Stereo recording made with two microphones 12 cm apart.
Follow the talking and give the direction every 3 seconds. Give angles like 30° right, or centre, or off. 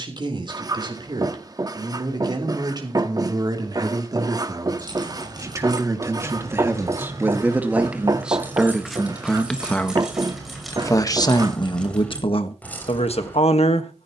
40° right, 30° right, 10° right, 20° left, 50° left.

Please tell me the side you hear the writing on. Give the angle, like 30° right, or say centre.
30° right.